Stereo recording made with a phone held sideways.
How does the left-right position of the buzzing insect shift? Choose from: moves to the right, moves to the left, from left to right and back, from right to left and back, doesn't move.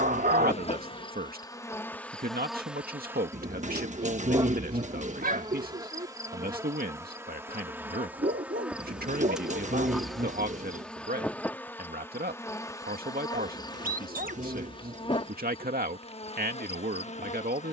from left to right and back.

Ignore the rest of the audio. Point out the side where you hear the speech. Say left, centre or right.
right.